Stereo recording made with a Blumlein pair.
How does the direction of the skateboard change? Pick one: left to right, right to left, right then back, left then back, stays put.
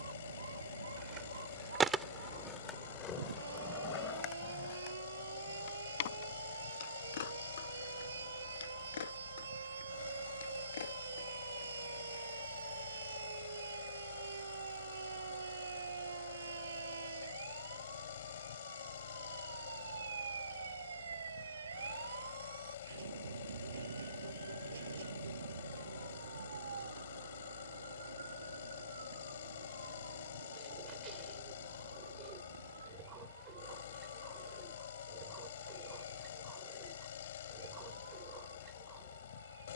right to left.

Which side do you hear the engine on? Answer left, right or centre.
left.